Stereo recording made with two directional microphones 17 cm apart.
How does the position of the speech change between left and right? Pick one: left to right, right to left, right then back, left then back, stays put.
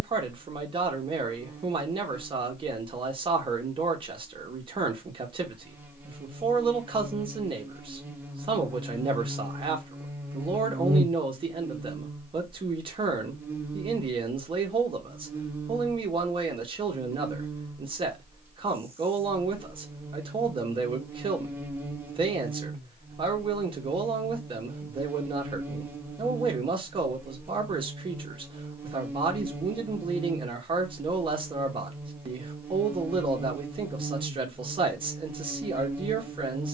stays put.